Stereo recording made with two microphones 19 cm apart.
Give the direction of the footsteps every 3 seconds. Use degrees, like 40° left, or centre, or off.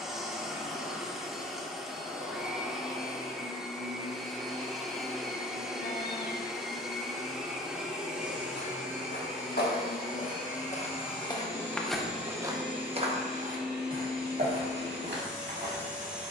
off, off, 60° left, 40° left, 40° right, 60° right.